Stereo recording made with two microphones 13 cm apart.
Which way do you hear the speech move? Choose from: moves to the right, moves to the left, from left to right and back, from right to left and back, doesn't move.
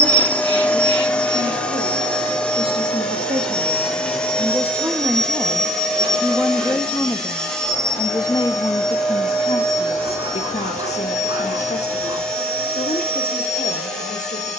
moves to the left.